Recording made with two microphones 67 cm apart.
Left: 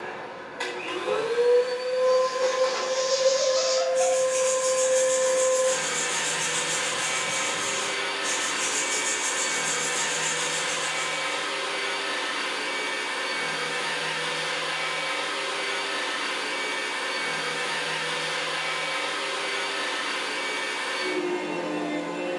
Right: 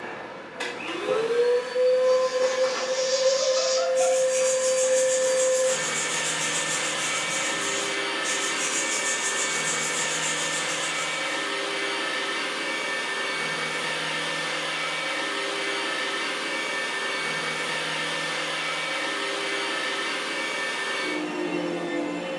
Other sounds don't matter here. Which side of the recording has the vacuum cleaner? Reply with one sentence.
You can hear the vacuum cleaner on the right.